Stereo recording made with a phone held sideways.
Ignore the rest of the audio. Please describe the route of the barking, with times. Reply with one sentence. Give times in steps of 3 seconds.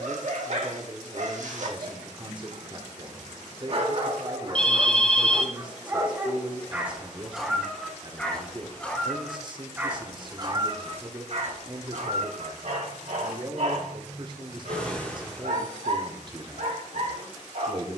You can hear the barking on the right from 0 s, in the centre from 6 s and on the right from 9 s.